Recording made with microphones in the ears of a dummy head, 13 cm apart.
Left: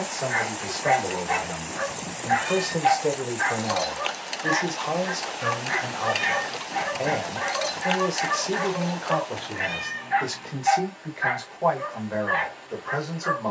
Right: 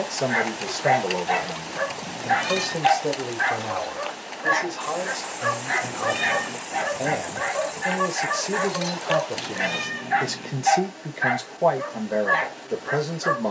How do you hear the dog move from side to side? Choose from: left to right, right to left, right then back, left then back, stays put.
stays put.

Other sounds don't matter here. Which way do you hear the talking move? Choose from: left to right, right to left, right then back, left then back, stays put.
left then back.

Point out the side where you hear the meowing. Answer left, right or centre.
right.